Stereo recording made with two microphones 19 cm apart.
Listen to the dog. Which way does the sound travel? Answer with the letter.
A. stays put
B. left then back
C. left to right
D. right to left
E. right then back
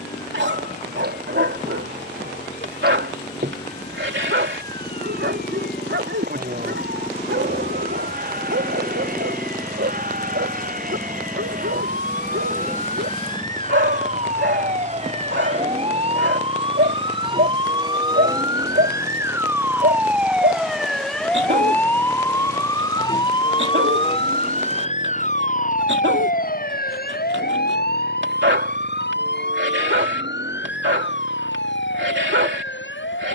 A.